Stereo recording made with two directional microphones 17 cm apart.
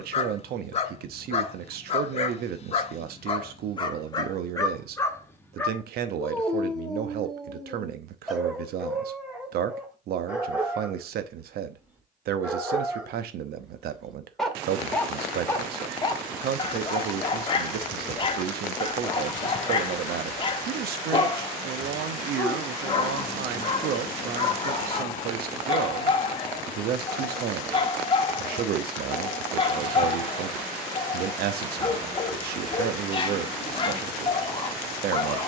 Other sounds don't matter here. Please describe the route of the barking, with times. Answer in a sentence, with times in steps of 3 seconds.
In this clip you hear the barking on the left from 0 s, in the centre from 6 s and on the left from 15 s.